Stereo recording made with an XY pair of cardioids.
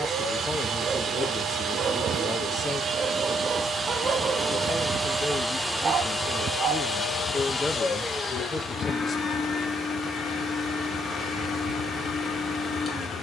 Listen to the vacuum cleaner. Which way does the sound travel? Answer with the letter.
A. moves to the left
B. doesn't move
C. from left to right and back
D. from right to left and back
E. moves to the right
A.